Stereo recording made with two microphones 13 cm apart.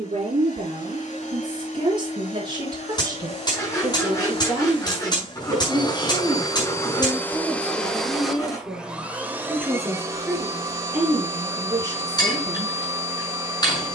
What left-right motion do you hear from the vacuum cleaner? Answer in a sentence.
You can hear the vacuum cleaner move from left to right.